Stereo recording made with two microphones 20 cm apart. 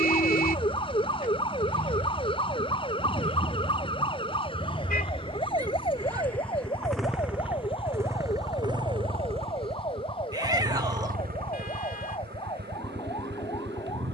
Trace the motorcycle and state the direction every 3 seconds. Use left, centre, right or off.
left, left, centre, right, right.